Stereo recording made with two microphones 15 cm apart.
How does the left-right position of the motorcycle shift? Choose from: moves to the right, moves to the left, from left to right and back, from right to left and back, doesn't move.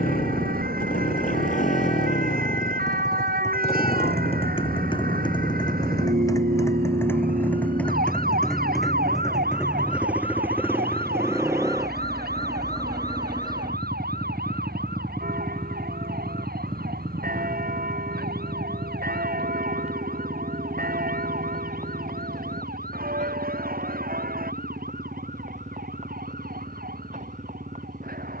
moves to the right.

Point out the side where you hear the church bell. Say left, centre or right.
right.